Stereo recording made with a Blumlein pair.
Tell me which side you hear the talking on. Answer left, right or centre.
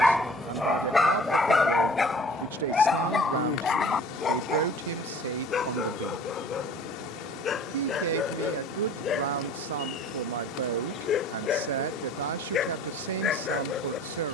right.